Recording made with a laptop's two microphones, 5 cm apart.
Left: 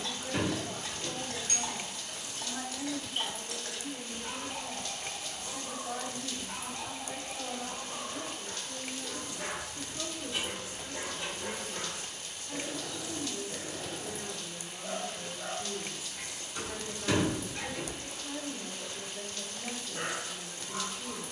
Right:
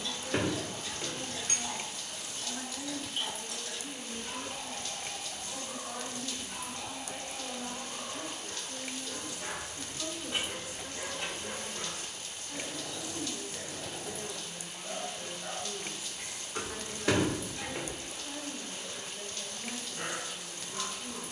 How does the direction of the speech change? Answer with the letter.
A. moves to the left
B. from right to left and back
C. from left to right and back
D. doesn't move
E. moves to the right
D.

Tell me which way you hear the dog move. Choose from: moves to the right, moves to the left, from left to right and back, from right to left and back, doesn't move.
doesn't move.